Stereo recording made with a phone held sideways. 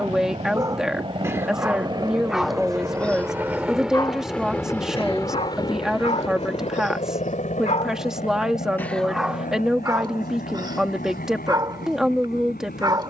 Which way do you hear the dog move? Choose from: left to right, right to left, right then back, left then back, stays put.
left then back.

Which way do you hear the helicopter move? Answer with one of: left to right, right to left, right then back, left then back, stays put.
right to left.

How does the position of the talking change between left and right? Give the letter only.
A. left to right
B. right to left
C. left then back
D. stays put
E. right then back
D.